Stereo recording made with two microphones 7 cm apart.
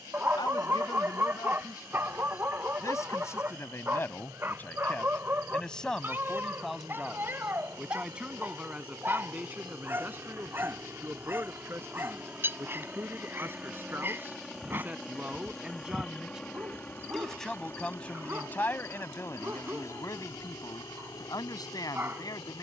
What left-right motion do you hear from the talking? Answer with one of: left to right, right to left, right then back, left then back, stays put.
right then back.